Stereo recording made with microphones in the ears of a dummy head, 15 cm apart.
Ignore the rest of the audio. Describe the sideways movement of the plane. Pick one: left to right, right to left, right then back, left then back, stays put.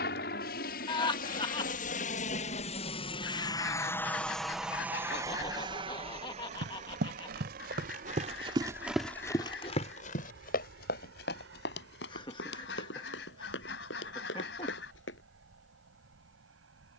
left to right.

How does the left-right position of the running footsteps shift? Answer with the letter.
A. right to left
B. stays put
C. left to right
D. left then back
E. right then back
A.